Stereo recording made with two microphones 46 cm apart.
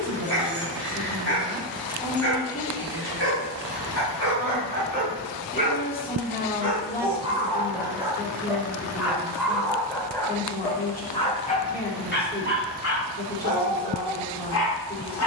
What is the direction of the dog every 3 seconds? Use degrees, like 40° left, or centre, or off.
20° right, 20° right, 10° right, 10° left, 40° left.